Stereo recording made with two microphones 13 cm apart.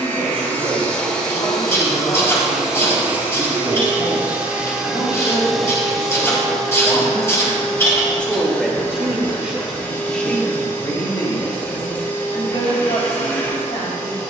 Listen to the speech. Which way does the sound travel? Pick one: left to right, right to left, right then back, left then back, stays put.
right then back.